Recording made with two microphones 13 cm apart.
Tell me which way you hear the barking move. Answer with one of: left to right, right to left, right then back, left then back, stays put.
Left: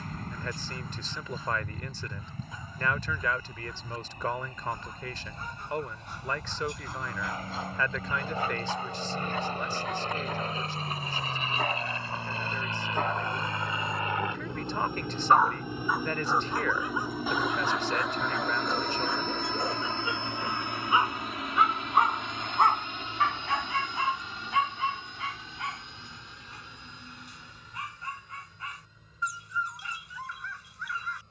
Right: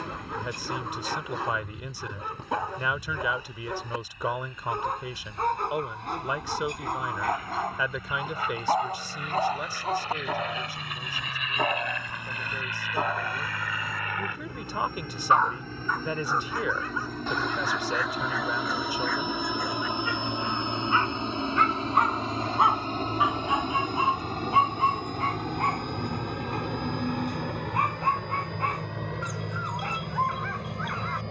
left then back.